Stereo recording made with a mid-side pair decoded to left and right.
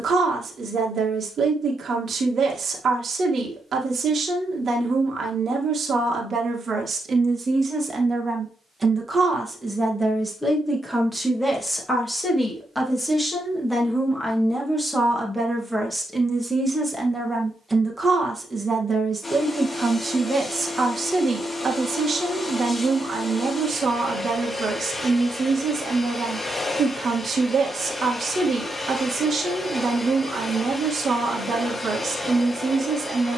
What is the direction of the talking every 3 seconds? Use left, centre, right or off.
right, right, right, centre, centre, centre, right, right, right, right, right.